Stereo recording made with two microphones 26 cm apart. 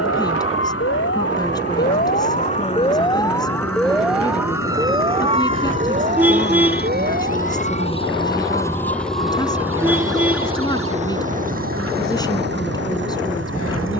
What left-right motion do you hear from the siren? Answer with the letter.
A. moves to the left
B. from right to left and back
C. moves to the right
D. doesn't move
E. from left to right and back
C.